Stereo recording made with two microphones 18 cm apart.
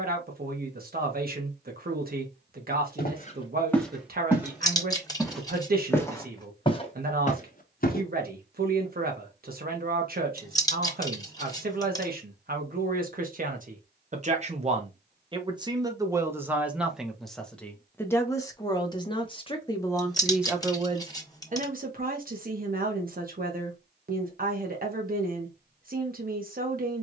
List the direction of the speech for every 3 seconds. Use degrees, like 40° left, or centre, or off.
60° right, 60° right, 60° right, 60° right, 50° right, 10° right, 10° left, 50° right, 50° right.